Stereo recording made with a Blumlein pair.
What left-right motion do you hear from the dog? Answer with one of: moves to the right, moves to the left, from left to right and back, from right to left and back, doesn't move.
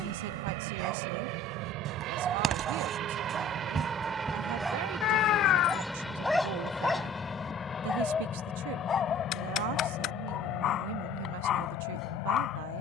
moves to the left.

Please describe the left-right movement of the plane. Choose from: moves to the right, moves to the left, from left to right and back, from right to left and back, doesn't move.
moves to the left.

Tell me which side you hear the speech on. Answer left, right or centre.
right.